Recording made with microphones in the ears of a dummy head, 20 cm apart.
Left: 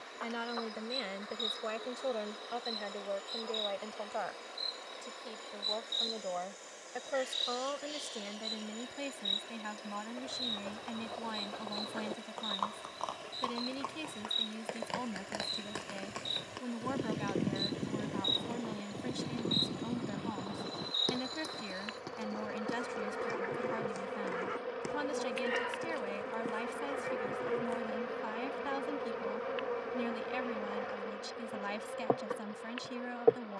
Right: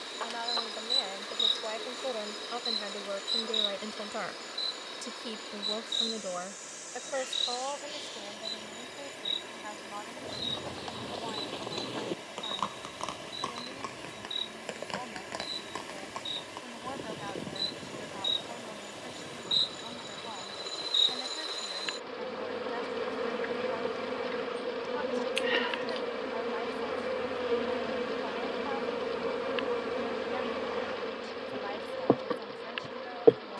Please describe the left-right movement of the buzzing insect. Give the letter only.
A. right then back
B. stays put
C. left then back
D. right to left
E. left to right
C.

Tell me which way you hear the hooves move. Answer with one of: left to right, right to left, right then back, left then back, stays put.
right to left.